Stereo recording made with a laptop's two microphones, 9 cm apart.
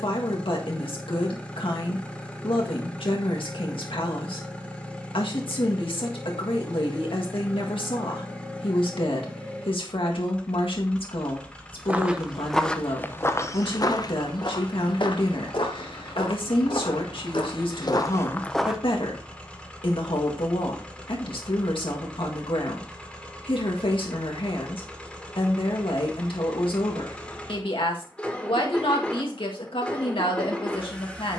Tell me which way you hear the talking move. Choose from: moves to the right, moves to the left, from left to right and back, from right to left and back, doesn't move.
doesn't move.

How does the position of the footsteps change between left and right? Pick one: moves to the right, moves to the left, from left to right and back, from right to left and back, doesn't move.
from right to left and back.